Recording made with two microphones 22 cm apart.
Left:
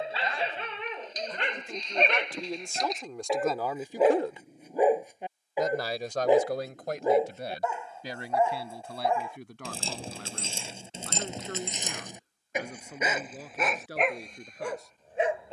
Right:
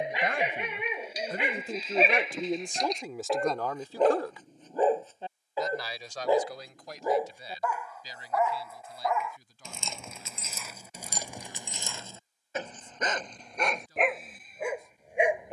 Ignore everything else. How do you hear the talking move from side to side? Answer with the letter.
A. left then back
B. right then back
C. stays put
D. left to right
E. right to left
E.